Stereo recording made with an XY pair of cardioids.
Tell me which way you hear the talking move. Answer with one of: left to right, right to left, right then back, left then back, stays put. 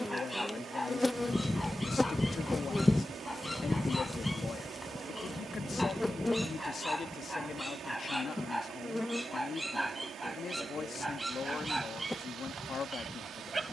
stays put.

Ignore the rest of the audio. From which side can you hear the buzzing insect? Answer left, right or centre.
centre.